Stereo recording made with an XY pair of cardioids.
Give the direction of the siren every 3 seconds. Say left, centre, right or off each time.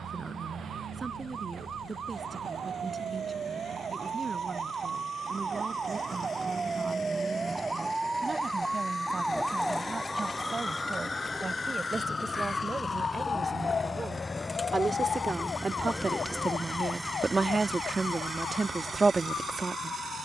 right, right, right, centre, left, left, left.